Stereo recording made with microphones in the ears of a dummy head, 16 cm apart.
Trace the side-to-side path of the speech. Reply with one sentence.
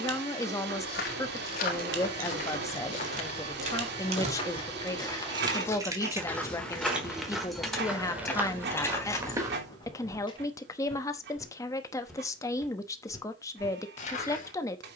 In this clip you hear the speech stay put.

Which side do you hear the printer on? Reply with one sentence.
You can hear the printer on the right.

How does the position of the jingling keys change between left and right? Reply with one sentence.
You can hear the jingling keys move to the left.